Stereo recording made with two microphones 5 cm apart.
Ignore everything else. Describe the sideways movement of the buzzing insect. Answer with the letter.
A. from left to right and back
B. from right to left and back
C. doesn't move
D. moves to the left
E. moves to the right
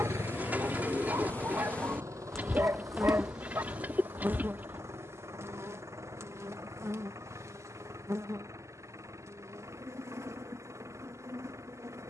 E.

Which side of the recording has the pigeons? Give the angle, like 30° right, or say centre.
30° right.